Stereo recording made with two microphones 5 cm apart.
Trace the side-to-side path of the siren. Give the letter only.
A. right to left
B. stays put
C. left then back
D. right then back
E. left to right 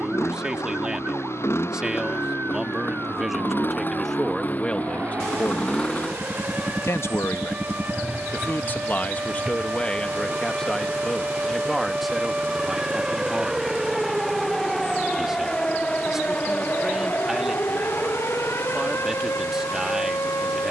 A.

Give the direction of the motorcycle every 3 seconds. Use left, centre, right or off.
left, left, centre, right, right, right, right.